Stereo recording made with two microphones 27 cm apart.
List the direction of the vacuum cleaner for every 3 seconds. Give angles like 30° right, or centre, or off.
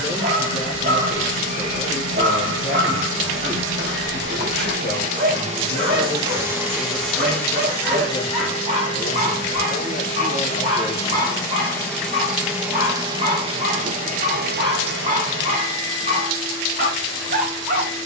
50° right, 40° right, 10° left, 20° left, 20° right, 50° right.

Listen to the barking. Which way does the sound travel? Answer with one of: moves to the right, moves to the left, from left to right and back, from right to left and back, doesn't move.
doesn't move.